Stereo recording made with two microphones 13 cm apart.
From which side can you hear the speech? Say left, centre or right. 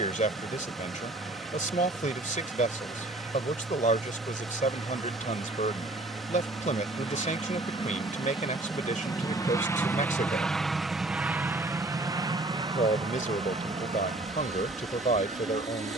left.